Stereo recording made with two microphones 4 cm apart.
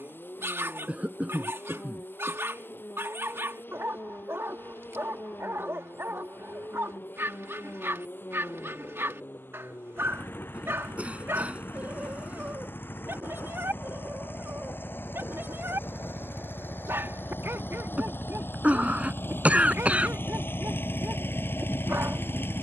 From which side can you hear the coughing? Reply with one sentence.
In this clip you hear the coughing on the right.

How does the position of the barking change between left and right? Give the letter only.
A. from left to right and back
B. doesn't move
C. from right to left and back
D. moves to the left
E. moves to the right
B.